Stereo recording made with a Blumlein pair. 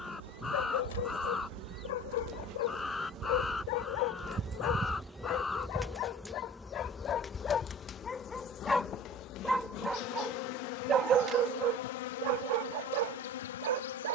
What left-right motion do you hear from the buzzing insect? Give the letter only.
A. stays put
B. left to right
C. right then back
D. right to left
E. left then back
D.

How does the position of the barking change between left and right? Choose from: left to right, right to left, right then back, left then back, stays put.
left to right.